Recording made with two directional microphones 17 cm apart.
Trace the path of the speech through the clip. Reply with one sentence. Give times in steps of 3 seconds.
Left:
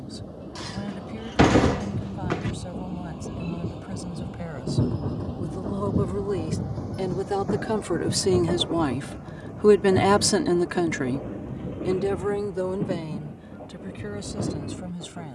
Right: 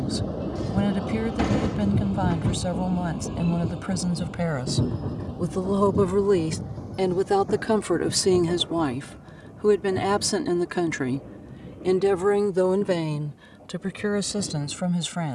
In this clip you hear the speech on the right from 0 s, in the centre from 9 s and on the right from 12 s.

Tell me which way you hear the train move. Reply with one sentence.
You can hear the train move to the left.